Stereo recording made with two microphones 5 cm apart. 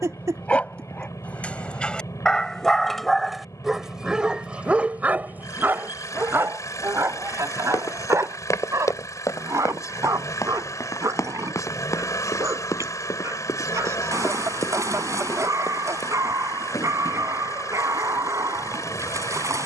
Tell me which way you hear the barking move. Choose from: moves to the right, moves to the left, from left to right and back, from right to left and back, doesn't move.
moves to the right.